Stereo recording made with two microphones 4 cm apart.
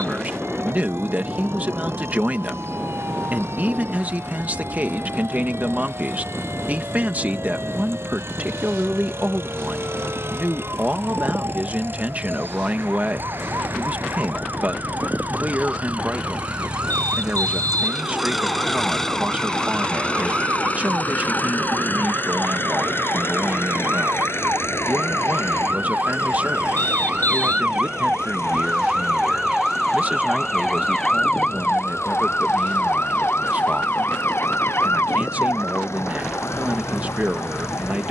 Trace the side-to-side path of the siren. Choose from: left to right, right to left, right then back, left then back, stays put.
right to left.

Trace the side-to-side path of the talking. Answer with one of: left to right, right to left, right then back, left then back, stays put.
stays put.